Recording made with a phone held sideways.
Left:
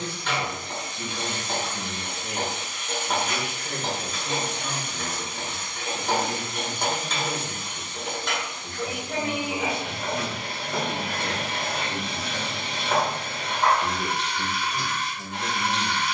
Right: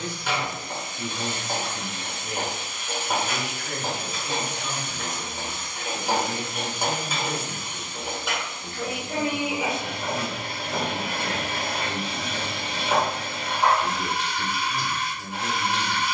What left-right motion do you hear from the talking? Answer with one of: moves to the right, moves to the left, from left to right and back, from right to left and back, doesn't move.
from left to right and back.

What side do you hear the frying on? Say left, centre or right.
centre.